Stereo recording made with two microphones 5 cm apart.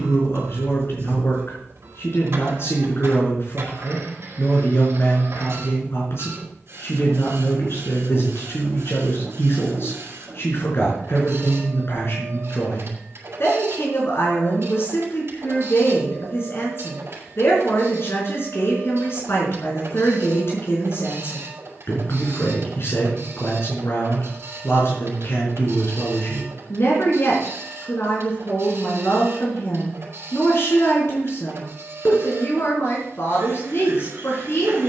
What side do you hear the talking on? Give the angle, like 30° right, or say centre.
60° left.